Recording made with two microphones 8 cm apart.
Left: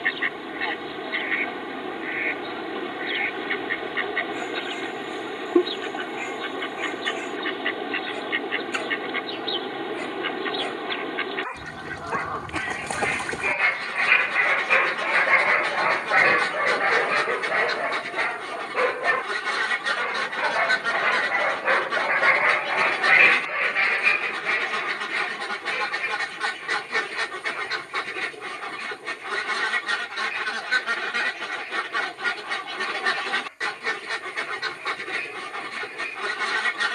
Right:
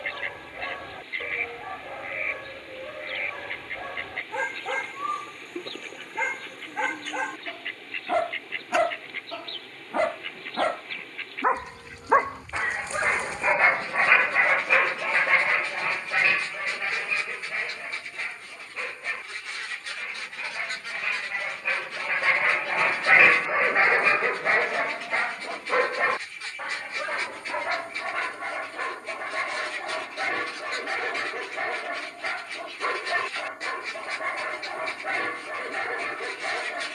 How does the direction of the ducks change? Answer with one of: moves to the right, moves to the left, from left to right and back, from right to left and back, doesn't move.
doesn't move.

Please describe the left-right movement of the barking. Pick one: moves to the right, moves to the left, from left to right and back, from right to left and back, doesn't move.
from right to left and back.